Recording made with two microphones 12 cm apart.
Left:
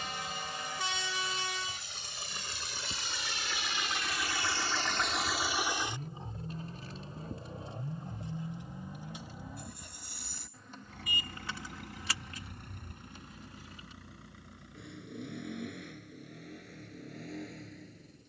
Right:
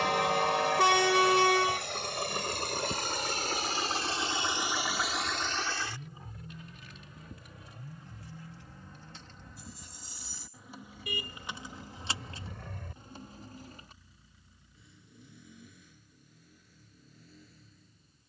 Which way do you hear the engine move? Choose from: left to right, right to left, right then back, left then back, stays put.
right to left.